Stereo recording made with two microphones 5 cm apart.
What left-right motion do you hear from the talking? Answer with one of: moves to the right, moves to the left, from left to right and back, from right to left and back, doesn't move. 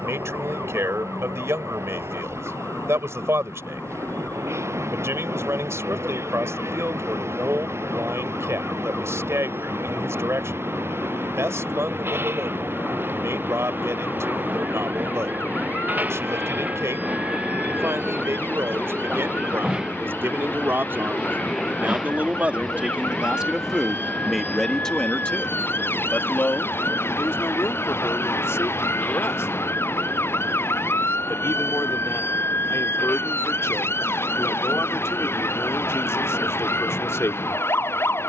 moves to the left.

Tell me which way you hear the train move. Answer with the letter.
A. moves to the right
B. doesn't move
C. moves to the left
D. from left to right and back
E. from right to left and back
C.